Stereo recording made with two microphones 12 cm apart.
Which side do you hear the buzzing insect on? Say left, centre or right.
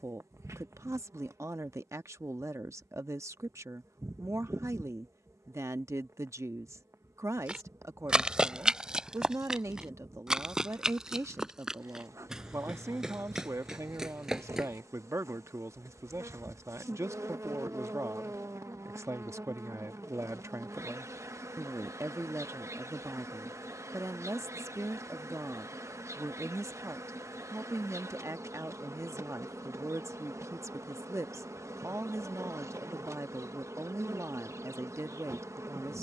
right.